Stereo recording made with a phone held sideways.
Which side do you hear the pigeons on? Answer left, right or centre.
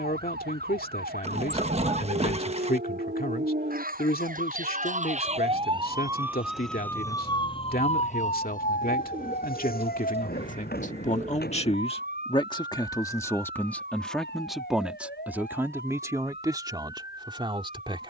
right.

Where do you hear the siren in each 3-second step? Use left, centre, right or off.
right, right, left, left, left, left.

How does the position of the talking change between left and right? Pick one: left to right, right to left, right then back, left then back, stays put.
left to right.